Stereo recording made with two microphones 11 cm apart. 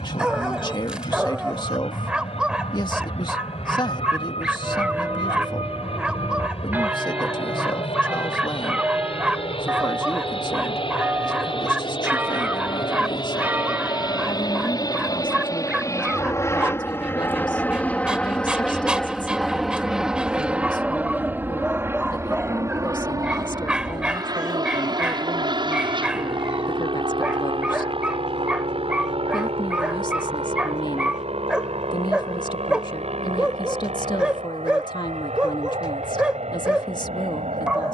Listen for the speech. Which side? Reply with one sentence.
In this clip you hear the speech on the left.